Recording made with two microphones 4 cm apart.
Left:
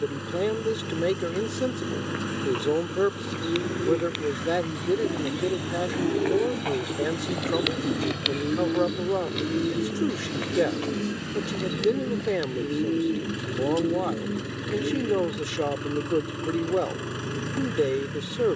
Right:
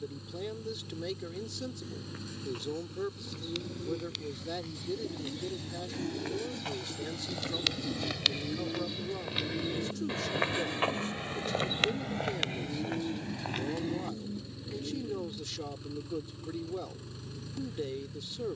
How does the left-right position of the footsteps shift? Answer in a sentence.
In this clip you hear the footsteps go from the left side to the right.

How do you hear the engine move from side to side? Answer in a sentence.
You can hear the engine stay in one place.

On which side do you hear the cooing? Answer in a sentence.
You can hear the cooing on the left.